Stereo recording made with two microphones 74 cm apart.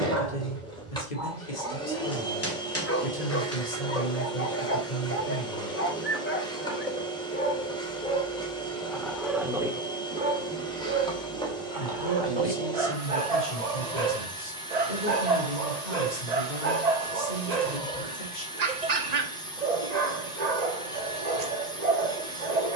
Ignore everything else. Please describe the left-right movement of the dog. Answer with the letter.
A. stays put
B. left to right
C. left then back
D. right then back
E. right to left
B.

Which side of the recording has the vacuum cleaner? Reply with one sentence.
You can hear the vacuum cleaner in the centre.